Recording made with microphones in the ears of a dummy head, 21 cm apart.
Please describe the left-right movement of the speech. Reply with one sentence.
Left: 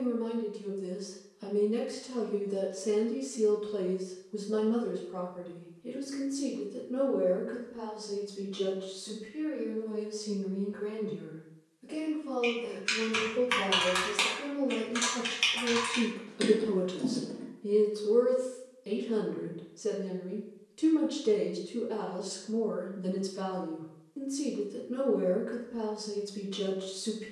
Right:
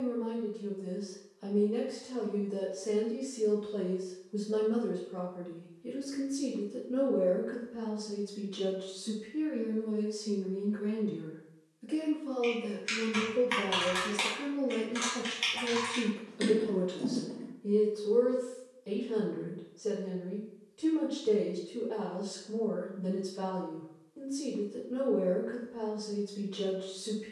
You can hear the speech go right and come back.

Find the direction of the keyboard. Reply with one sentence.
You can hear the keyboard in the centre.